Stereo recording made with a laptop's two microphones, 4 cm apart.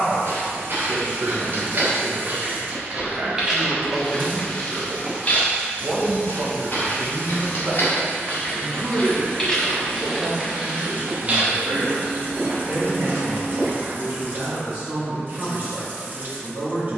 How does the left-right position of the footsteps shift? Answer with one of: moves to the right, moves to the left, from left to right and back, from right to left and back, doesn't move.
from right to left and back.